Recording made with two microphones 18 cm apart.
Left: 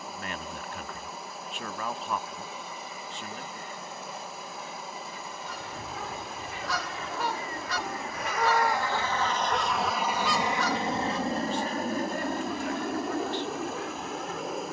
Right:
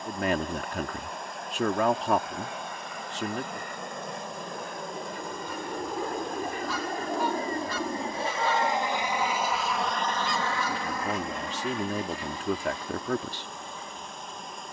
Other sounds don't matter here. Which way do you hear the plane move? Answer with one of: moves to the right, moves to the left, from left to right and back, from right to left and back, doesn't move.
moves to the left.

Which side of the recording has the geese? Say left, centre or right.
left.